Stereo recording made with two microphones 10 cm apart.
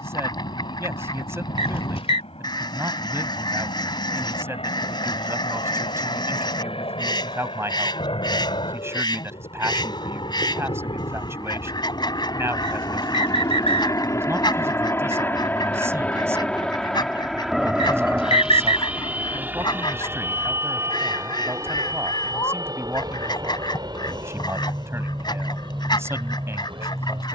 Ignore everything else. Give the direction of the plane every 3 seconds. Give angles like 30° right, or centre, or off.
80° left, 70° left, 60° left, 50° left, 30° left, 10° left, 20° right, 30° right, 40° right.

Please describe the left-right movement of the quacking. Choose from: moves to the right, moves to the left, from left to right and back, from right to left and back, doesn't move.
doesn't move.